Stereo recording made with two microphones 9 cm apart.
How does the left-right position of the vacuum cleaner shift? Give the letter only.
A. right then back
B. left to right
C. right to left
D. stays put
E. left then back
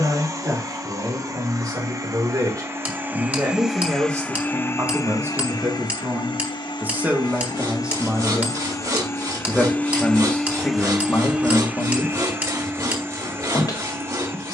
E.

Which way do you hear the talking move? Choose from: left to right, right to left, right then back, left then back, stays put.
right to left.